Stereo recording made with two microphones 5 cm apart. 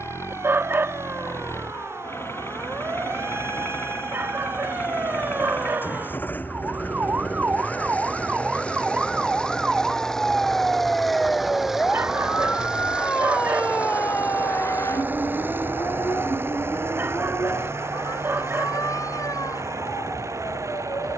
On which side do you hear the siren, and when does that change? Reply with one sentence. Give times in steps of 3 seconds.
You can hear the siren on the right from 0 s, in the centre from 9 s and on the left from 12 s.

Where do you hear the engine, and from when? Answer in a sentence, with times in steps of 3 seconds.
In this clip you hear the engine on the left from 0 s, in the centre from 9 s and on the right from 12 s.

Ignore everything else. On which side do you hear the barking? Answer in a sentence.
In this clip you hear the barking on the right.